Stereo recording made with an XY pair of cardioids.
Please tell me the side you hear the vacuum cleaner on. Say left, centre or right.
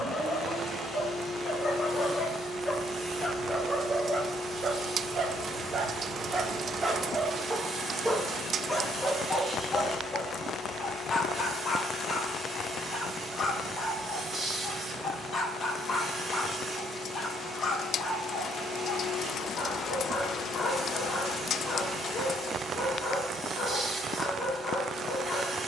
right.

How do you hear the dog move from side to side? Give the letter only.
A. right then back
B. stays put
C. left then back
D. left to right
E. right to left
A.